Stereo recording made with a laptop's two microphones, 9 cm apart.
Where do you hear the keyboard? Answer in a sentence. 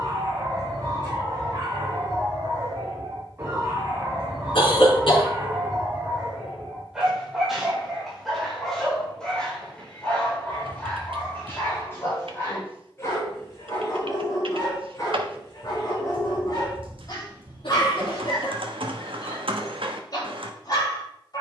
You can hear the keyboard on the right.